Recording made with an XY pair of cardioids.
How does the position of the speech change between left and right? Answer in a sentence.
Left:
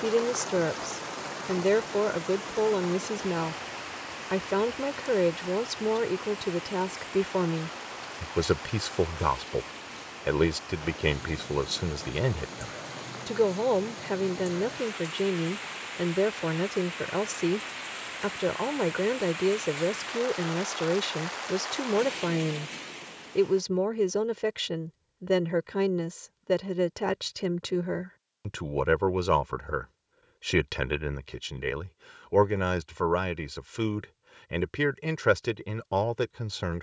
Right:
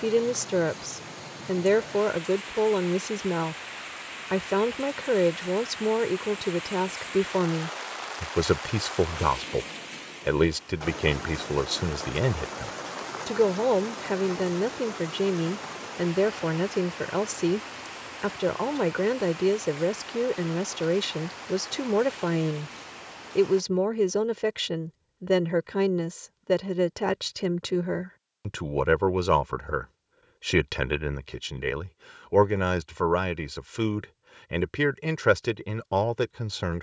In this clip you hear the speech stay in one place.